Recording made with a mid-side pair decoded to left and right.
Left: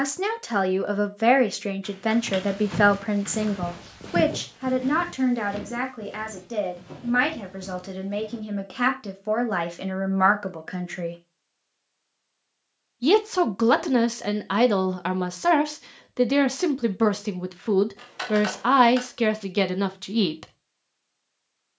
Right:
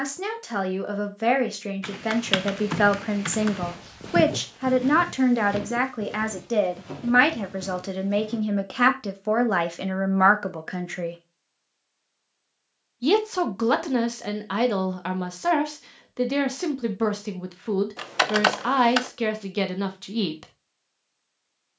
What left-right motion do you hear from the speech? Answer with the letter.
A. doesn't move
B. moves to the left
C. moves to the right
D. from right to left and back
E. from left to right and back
E.